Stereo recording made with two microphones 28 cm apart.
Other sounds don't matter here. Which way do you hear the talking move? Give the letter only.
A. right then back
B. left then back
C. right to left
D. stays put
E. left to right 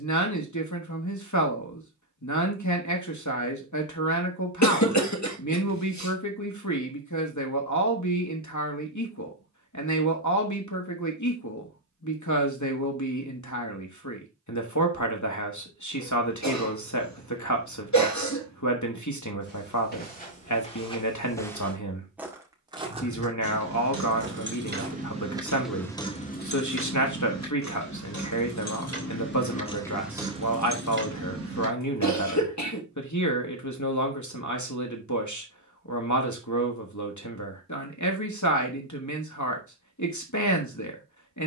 D.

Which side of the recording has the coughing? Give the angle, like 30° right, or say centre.
70° left.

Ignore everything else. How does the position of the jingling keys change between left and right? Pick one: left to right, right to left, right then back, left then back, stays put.
left then back.